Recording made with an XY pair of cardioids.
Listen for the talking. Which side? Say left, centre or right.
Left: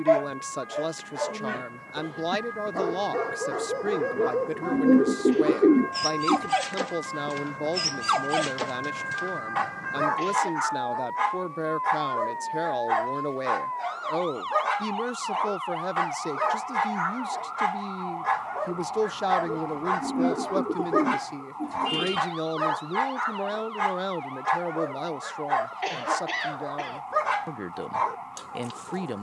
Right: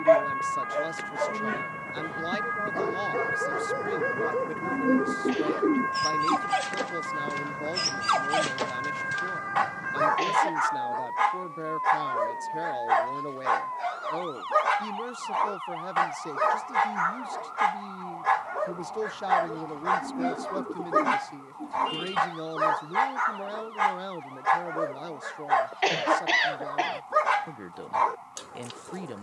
left.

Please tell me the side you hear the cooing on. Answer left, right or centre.
left.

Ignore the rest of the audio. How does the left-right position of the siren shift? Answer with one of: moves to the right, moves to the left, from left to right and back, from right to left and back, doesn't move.
moves to the left.